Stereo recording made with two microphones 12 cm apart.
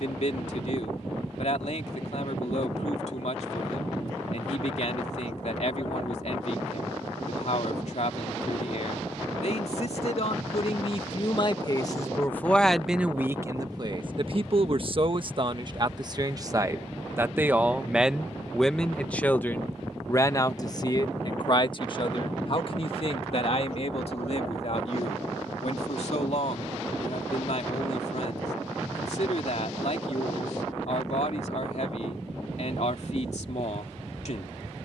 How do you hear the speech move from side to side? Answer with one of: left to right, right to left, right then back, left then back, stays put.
right then back.